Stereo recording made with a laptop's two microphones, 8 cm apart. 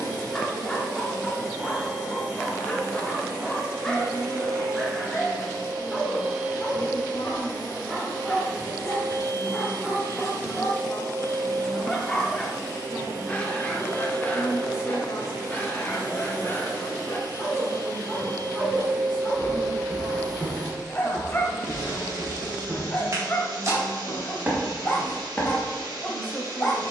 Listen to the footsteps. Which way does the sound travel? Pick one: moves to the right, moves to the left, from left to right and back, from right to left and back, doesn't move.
from left to right and back.